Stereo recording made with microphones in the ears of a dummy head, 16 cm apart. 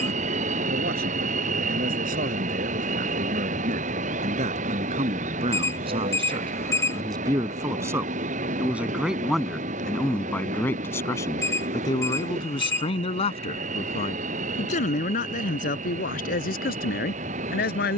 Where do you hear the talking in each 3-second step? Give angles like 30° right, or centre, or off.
50° right, 40° right, 20° right, 10° left, 30° left, 50° left.